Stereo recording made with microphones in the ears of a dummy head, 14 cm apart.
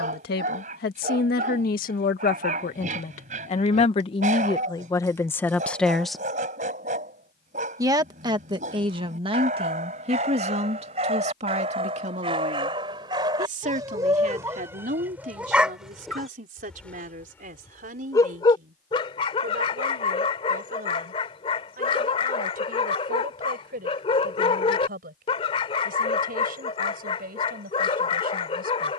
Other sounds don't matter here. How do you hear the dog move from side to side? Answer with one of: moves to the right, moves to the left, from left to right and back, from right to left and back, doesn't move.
moves to the left.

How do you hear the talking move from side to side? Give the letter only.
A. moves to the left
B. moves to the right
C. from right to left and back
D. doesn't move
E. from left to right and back
B.